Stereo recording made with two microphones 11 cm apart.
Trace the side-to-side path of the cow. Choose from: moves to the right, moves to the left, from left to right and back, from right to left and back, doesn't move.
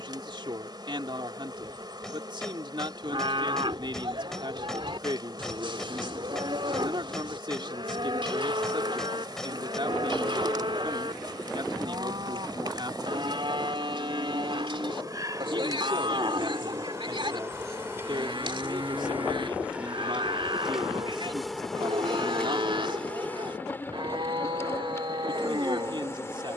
doesn't move.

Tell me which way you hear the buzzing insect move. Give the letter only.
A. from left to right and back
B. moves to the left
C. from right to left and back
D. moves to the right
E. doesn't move
B.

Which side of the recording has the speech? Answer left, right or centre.
right.